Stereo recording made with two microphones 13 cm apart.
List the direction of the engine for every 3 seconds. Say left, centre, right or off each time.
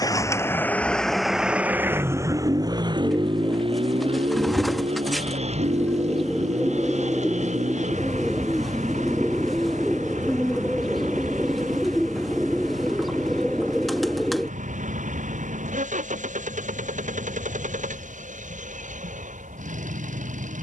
centre, right, right, right, right, right, right.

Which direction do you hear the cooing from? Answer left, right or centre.
centre.